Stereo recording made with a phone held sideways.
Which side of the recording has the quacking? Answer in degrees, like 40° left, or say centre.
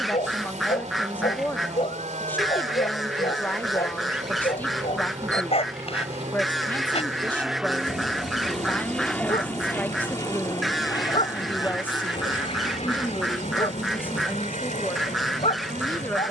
centre.